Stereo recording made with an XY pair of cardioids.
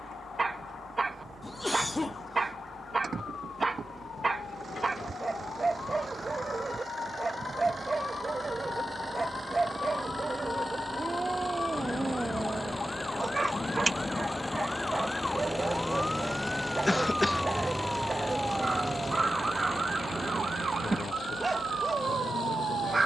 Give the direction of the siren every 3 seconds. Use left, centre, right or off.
left, left, left, left, left, centre, right, right.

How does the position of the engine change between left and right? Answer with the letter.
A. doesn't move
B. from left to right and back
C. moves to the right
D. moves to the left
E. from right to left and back
D.